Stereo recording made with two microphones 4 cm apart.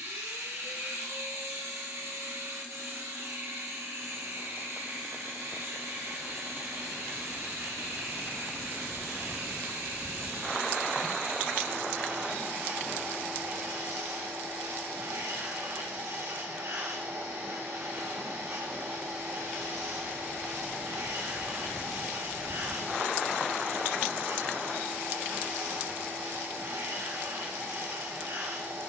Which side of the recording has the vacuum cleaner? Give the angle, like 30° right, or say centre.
80° right.